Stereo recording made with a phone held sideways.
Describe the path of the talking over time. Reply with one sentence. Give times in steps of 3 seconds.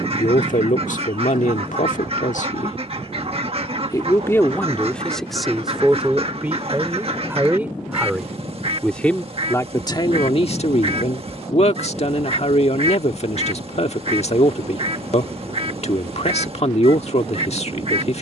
In this clip you hear the talking on the left from 0 s, in the centre from 3 s and on the left from 9 s.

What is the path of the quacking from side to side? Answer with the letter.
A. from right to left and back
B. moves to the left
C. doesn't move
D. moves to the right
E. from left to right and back
C.